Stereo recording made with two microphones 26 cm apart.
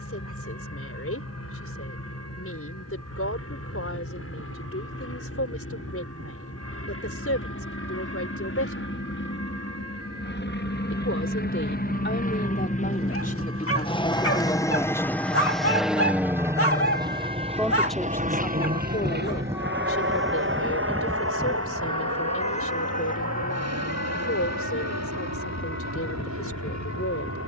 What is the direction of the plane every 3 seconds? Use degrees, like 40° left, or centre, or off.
70° left, 60° left, 60° left, 40° left, 20° left, 10° right, 40° right, 60° right, 70° right.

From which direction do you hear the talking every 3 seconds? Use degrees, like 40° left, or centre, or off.
60° left, 60° left, 60° left, 50° left, 30° left, centre, 40° left, 60° left, 60° left.